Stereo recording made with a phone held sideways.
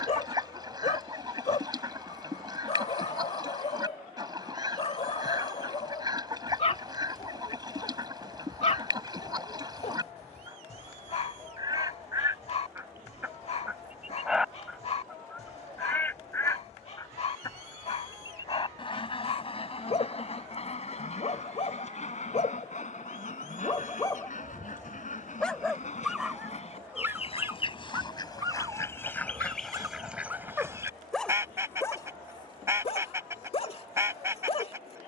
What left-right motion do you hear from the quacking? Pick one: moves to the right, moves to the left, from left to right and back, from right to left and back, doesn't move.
from right to left and back.